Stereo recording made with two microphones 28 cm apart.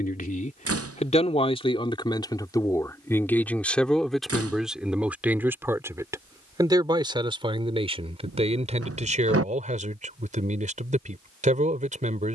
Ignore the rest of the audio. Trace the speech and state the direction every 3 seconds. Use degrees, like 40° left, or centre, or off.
20° left, centre, 20° right, 20° right.